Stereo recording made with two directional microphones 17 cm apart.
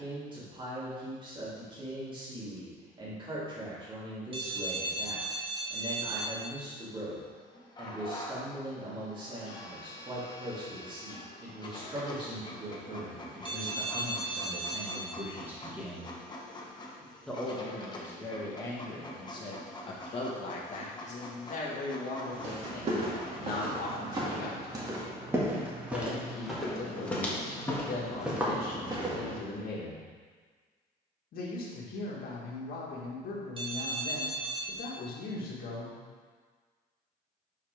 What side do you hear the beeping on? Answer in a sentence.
In this clip you hear the beeping on the right.